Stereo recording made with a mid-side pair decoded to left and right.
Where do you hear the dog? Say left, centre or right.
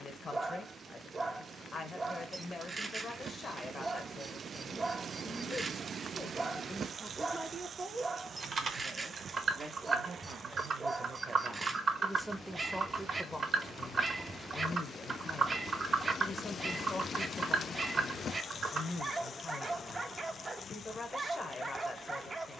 right.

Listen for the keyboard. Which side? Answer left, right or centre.
right.